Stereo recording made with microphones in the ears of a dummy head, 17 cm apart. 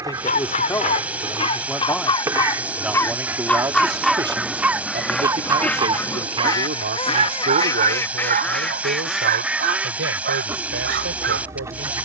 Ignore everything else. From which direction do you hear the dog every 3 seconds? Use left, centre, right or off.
left, centre, right, right.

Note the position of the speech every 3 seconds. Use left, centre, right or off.
centre, right, right, right.